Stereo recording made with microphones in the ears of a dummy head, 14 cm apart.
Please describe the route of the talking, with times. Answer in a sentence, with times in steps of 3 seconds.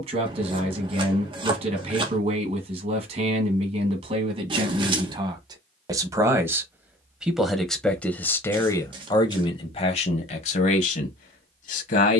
You can hear the talking on the right from 0 s, in the centre from 6 s and on the left from 9 s.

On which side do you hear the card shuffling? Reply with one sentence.
In this clip you hear the card shuffling on the right.